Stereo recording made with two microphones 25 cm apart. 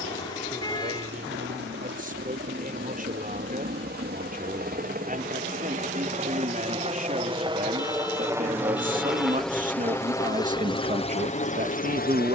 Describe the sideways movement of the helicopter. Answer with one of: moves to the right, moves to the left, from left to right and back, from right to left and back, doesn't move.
moves to the left.